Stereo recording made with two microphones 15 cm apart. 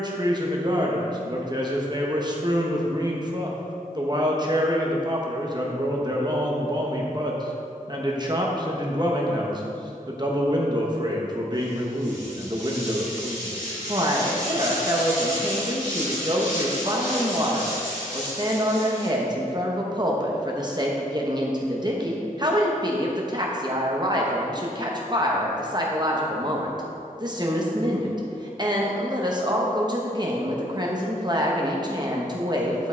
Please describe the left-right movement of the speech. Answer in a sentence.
You can hear the speech stay put.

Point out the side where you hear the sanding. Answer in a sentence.
You can hear the sanding on the left.